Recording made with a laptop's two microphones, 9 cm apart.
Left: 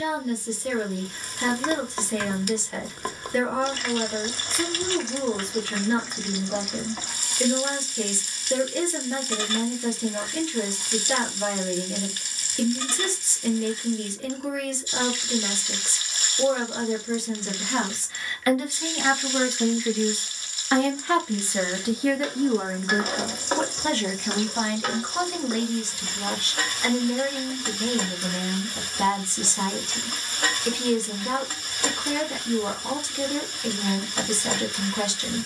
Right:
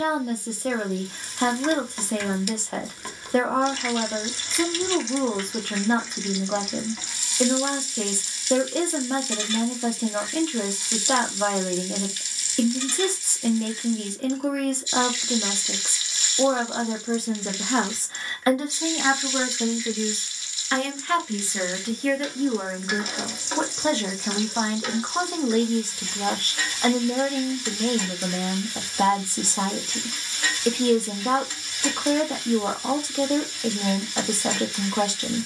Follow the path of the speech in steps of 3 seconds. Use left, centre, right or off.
right, right, right, right, right, right, centre, centre, right, right, right, right.